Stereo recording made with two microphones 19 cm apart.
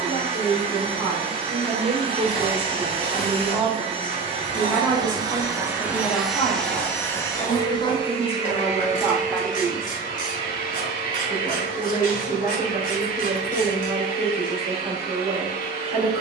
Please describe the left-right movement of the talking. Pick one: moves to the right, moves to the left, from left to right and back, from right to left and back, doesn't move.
from right to left and back.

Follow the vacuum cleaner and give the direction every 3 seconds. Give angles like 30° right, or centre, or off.
30° right, 20° right, 20° left, 50° left, 50° left, 50° left.